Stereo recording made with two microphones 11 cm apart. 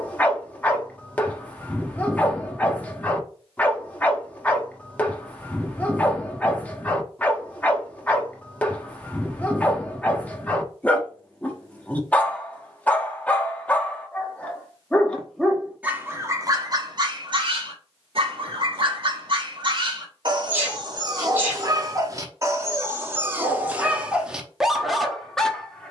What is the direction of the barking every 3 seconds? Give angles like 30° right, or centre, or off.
10° left, 10° left, 10° left, 10° left, 10° left, 30° right, 50° right, 30° right, centre.